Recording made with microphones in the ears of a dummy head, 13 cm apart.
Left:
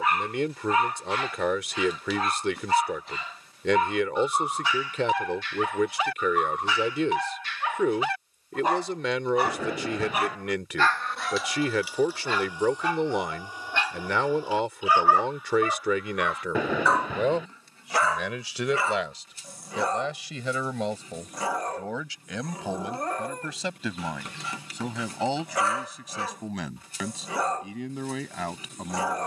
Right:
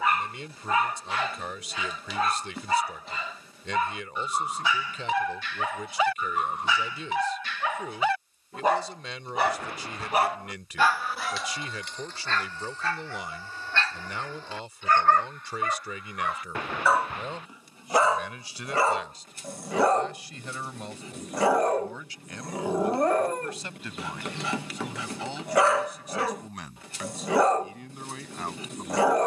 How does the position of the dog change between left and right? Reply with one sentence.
You can hear the dog move from right to left and back again.